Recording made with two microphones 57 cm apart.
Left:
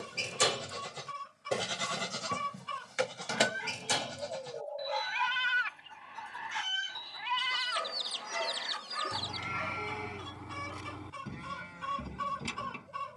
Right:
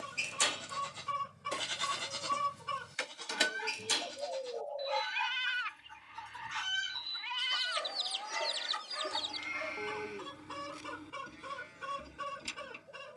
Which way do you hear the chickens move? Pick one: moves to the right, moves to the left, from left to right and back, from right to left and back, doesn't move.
moves to the left.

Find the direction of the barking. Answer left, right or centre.
left.